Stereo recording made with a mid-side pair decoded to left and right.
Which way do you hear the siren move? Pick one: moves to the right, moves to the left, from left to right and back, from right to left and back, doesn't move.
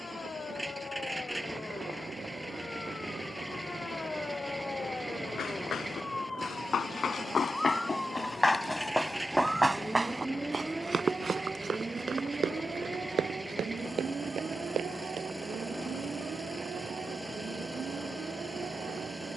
moves to the right.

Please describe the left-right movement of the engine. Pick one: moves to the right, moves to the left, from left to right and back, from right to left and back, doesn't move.
doesn't move.